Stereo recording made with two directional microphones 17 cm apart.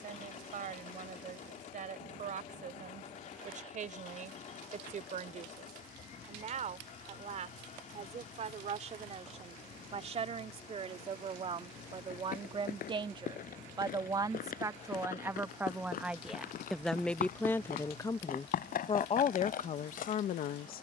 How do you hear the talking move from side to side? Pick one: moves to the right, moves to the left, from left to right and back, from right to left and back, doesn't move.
moves to the left.